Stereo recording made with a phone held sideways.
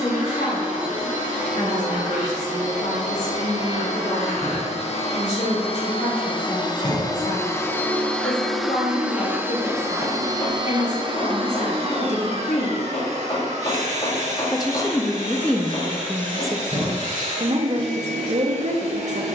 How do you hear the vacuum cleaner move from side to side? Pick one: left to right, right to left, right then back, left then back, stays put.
left to right.